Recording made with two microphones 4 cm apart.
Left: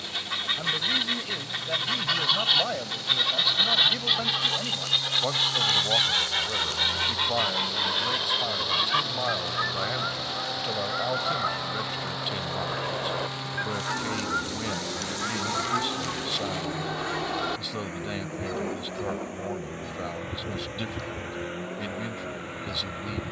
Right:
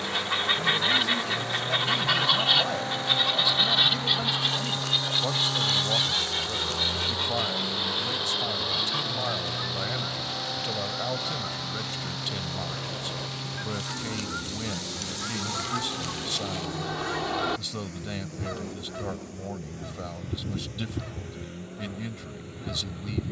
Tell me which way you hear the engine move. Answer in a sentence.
In this clip you hear the engine move from right to left.